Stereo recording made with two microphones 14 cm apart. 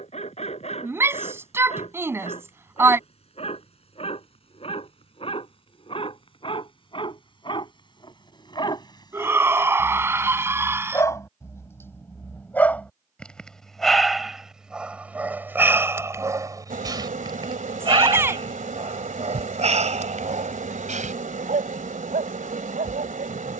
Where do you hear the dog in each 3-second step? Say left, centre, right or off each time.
left, left, left, left, centre, right, right, right.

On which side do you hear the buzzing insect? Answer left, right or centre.
right.